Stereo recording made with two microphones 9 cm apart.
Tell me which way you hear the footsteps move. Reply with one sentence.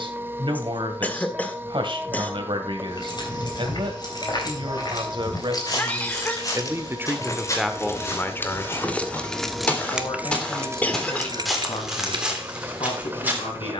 You can hear the footsteps move to the right.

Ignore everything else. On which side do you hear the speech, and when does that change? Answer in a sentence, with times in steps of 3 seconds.
You can hear the speech on the right from 0 s, in the centre from 6 s and on the left from 9 s.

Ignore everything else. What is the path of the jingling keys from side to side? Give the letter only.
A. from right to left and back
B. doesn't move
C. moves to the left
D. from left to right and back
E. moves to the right
E.